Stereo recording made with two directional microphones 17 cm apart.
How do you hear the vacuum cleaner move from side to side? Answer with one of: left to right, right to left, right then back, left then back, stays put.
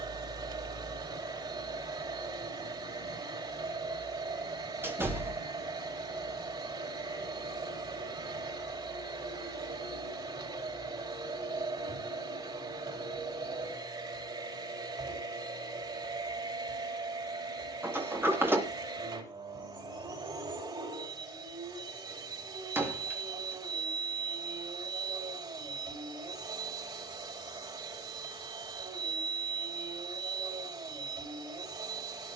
stays put.